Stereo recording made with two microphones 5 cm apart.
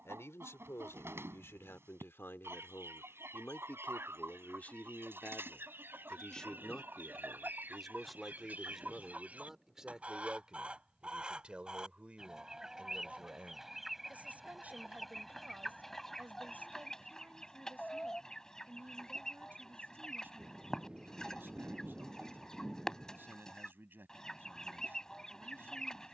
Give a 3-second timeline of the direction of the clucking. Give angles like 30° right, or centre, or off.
60° right, 50° right, 40° right, 20° right, 10° right, 10° left, 10° left, 10° left, 10° left.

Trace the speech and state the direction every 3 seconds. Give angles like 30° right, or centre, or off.
60° left, 30° left, centre, 20° right, 30° right, 40° right, 40° right, 40° right, 40° right.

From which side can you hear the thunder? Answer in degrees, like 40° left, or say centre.
10° right.